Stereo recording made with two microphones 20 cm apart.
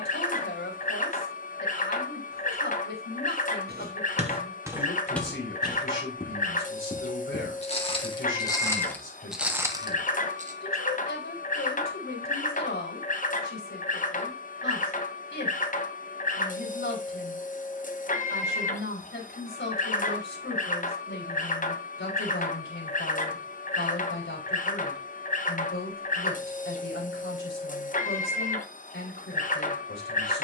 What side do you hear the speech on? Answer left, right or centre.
left.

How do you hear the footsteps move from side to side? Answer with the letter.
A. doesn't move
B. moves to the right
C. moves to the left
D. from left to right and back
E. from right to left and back
E.